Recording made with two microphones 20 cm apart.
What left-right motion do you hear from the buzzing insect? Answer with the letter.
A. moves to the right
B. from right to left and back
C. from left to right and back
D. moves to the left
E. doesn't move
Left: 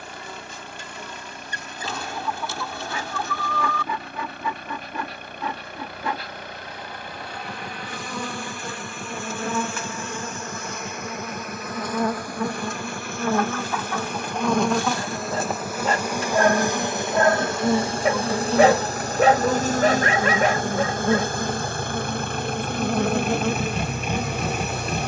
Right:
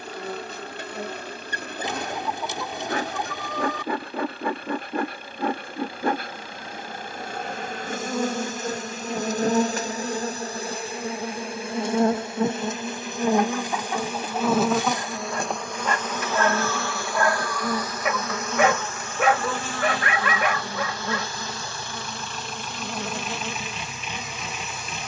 D.